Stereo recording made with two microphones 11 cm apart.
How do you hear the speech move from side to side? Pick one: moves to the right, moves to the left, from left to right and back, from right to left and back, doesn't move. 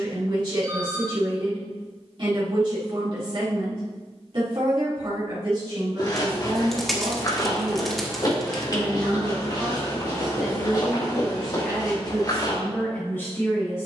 moves to the left.